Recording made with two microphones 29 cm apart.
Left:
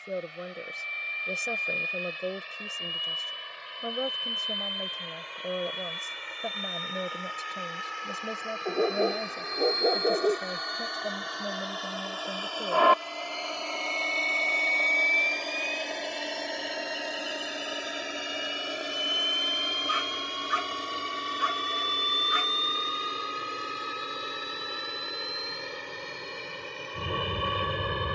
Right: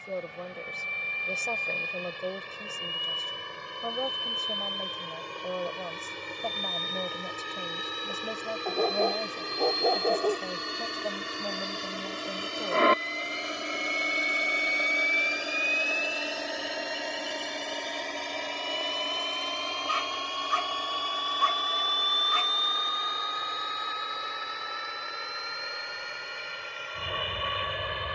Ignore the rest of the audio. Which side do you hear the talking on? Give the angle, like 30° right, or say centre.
10° left.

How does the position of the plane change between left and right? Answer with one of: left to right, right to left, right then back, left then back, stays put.
right to left.